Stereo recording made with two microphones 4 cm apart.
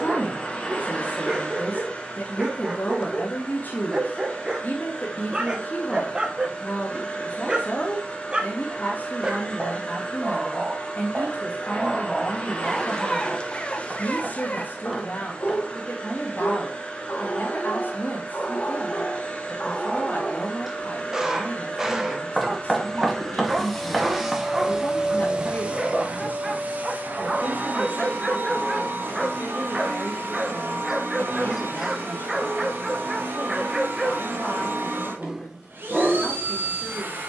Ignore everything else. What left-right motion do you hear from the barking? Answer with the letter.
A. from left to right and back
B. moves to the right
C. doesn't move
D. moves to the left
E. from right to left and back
E.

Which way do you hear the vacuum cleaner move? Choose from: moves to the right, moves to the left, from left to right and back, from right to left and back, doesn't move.
moves to the right.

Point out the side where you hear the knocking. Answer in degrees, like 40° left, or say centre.
centre.